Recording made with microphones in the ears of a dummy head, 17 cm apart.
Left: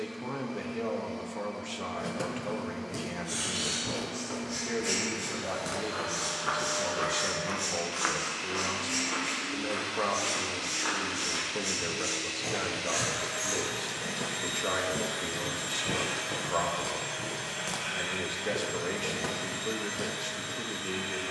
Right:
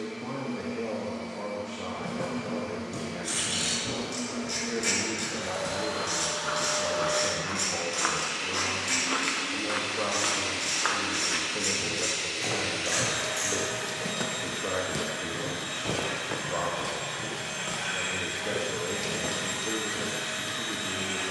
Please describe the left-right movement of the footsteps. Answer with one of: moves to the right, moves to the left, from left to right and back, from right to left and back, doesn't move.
from left to right and back.